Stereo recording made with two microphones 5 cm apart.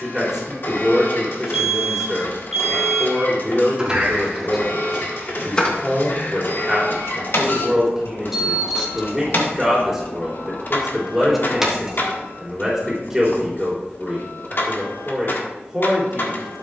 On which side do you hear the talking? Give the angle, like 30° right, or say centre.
10° right.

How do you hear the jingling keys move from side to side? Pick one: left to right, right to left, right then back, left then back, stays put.
left then back.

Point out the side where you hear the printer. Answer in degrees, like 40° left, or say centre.
50° left.